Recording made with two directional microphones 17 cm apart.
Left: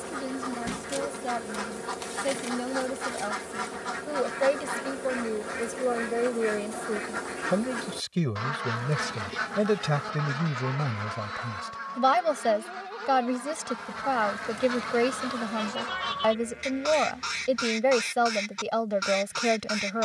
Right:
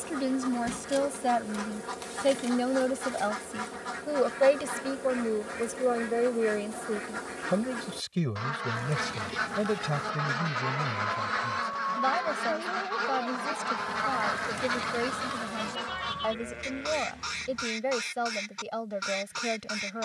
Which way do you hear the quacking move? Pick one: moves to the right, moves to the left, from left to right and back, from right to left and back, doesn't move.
from left to right and back.